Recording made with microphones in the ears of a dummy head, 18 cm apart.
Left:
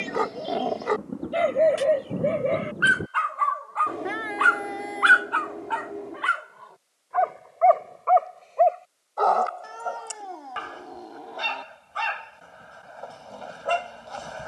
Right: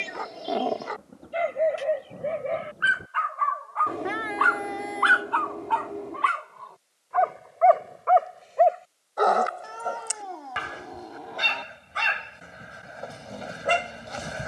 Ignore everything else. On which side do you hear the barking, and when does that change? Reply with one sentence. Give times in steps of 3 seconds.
You can hear the barking on the left from 0 s, in the centre from 6 s and on the right from 9 s.